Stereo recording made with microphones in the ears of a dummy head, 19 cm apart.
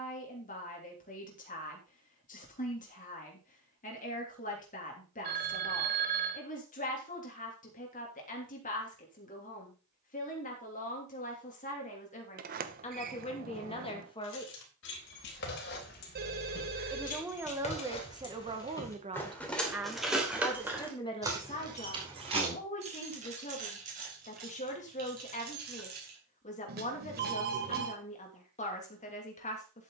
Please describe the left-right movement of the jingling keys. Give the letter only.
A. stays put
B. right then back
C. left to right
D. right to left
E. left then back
C.